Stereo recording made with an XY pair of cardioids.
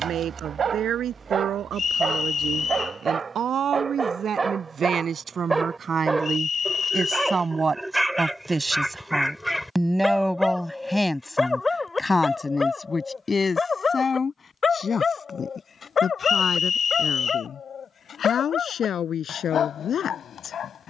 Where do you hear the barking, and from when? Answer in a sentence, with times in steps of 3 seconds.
You can hear the barking on the right from 0 s, in the centre from 6 s and on the left from 12 s.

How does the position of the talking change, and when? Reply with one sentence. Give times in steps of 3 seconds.
In this clip you hear the talking on the right from 0 s, in the centre from 9 s and on the left from 12 s.